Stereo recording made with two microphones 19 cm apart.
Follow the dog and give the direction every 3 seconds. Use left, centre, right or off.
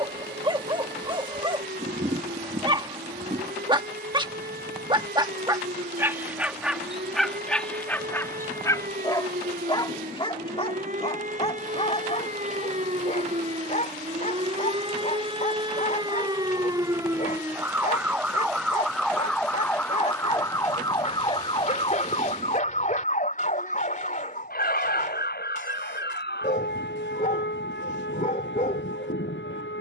right, right, centre, left, left, left, left, left, left, left.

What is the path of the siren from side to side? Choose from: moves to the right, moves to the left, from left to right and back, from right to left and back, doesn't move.
moves to the left.